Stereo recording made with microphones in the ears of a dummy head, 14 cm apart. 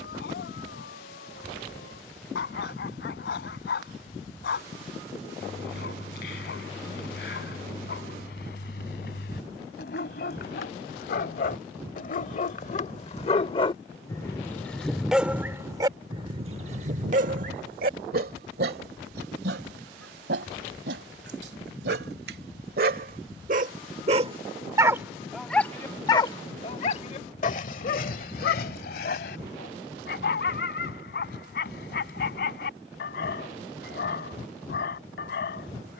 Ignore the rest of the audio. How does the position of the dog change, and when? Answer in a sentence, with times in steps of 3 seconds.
You can hear the dog on the left from 0 s, on the right from 15 s, in the centre from 24 s and on the left from 27 s.